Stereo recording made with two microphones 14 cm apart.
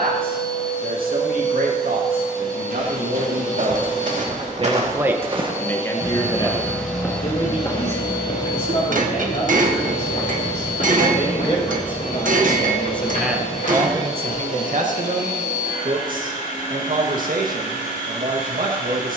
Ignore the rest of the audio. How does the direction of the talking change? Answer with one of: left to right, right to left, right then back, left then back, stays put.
left then back.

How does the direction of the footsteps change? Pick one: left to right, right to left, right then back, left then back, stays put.
right to left.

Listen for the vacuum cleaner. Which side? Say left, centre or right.
left.